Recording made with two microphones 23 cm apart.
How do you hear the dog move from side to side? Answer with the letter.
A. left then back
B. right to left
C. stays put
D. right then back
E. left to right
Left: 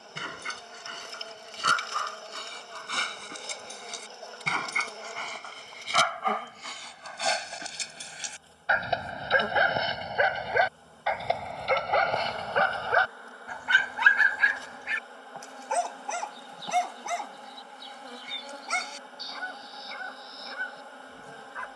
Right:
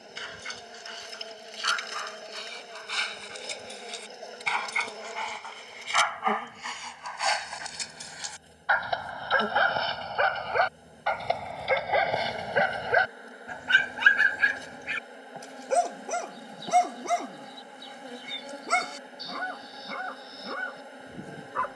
E.